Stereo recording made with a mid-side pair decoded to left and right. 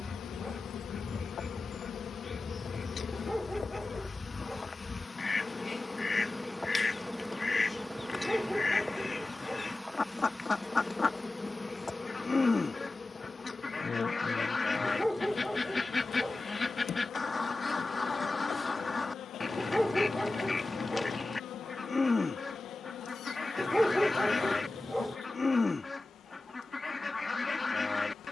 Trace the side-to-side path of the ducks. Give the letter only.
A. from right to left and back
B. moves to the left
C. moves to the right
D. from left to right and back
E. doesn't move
E.